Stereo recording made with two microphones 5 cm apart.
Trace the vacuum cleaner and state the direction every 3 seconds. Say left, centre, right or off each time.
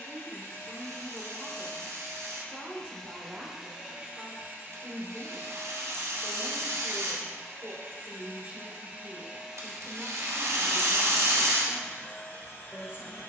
left, right, right, centre, left.